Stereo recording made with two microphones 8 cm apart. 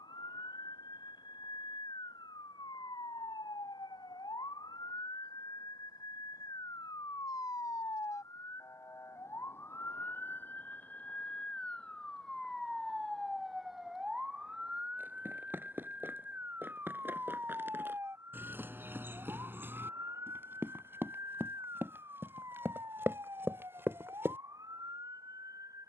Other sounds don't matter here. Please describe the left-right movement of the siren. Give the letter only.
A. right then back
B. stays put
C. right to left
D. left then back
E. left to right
E.